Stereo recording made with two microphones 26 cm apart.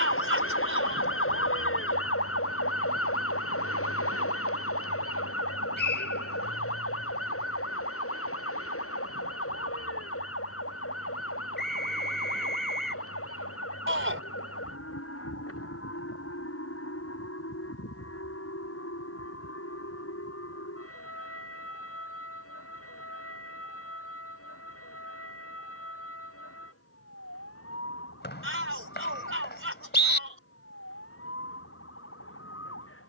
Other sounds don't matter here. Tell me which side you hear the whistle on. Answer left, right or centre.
left.